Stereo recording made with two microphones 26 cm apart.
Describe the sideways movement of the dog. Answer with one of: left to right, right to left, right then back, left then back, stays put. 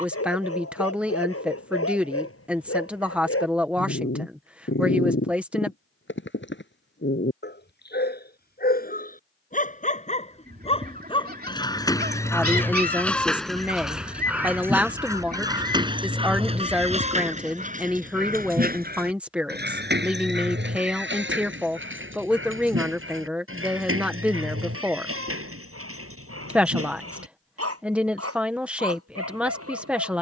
left to right.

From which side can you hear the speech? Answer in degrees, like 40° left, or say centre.
centre.